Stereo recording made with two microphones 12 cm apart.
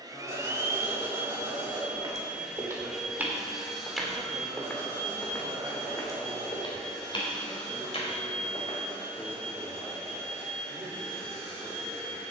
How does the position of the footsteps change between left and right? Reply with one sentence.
In this clip you hear the footsteps move to the left.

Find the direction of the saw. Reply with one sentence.
In this clip you hear the saw on the right.